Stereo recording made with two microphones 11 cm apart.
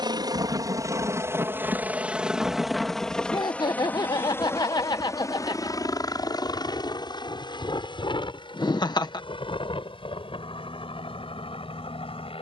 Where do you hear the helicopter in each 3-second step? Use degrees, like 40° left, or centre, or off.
20° right, 20° left, 40° left, 50° left.